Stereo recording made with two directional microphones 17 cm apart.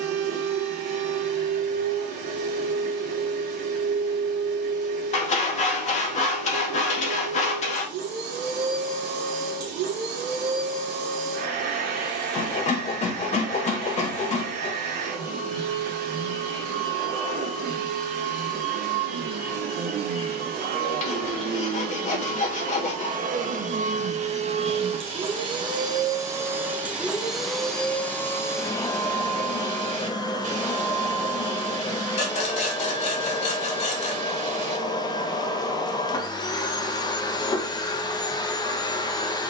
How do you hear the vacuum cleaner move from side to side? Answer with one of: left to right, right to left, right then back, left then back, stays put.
right to left.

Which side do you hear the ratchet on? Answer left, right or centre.
right.